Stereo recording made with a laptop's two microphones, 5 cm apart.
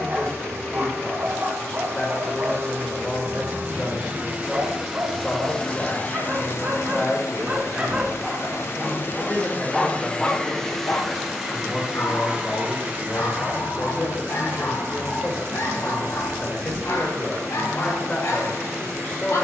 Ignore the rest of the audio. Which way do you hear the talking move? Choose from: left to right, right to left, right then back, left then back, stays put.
stays put.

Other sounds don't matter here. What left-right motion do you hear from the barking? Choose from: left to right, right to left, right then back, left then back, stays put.
right to left.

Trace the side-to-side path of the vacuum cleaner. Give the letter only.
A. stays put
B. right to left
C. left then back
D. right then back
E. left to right
C.